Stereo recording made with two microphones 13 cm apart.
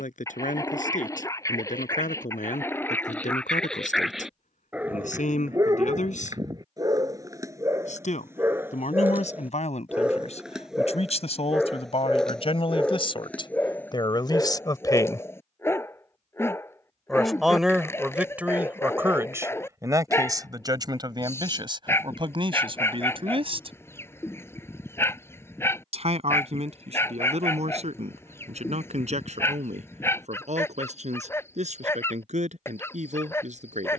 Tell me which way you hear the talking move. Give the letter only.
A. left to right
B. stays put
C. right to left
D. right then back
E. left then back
A.